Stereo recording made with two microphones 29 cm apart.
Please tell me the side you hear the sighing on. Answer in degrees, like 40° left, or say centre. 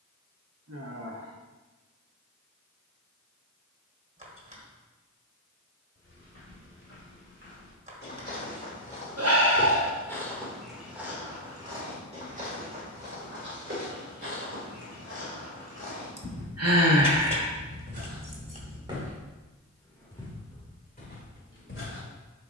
50° right.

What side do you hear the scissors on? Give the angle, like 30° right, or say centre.
20° right.